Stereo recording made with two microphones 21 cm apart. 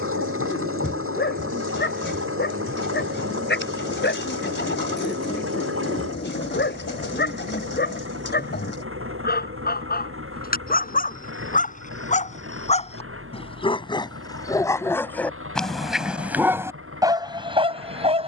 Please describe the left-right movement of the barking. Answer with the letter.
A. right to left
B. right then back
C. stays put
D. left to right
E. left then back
D.